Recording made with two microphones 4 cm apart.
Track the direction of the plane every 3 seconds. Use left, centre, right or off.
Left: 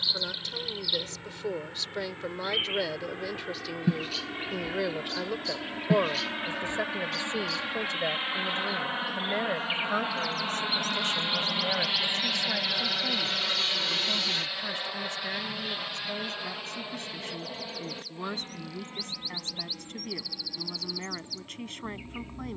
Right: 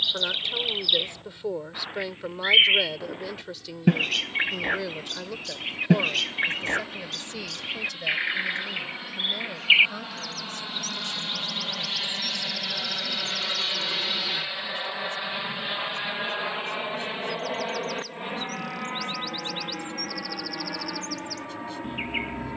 left, left, left, left, centre, right, right, right.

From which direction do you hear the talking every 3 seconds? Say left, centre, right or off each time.
centre, centre, left, left, left, left, left, left.